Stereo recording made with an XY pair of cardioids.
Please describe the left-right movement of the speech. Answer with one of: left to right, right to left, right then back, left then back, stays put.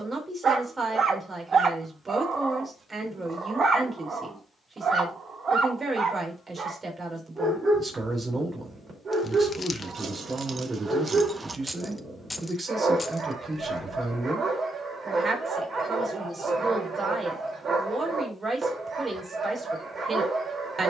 stays put.